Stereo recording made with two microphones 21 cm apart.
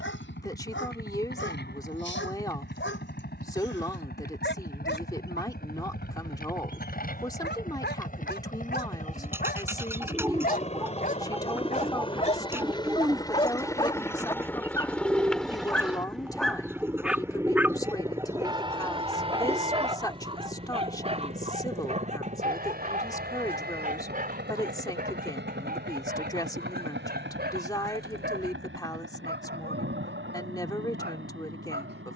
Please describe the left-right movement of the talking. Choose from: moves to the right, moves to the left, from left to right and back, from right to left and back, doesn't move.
doesn't move.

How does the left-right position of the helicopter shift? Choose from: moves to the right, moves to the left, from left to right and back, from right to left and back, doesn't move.
moves to the right.